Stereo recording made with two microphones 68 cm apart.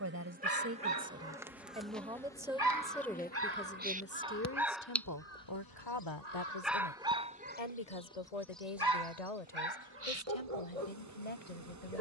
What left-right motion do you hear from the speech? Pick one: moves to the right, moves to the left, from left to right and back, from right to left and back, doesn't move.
moves to the left.